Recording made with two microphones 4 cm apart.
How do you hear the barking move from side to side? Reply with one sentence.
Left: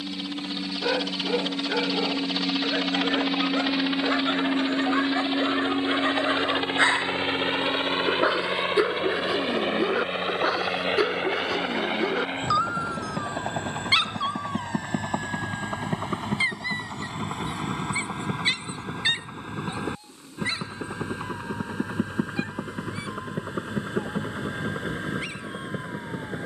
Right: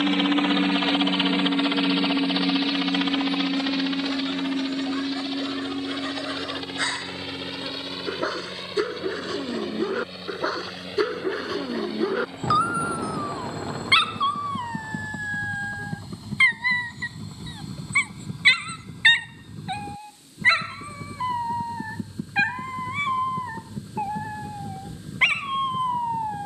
You can hear the barking go from the left side to the right.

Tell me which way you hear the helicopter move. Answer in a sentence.
You can hear the helicopter travel towards the left.